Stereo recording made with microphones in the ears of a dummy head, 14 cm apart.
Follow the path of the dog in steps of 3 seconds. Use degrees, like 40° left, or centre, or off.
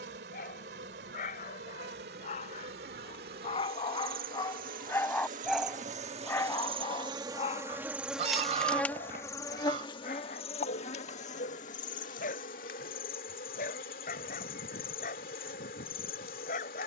50° left, 20° left, 30° left, 50° left, 50° left, 50° left.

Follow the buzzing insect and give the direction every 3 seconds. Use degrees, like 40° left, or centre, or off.
70° right, 60° right, 20° right, 40° left, 60° left, 60° left.